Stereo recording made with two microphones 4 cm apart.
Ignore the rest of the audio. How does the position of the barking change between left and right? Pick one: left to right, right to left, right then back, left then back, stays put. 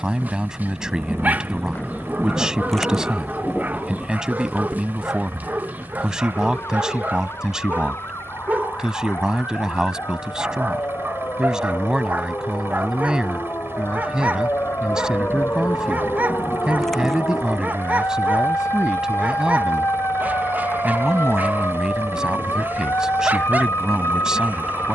stays put.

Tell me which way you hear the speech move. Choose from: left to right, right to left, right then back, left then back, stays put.
stays put.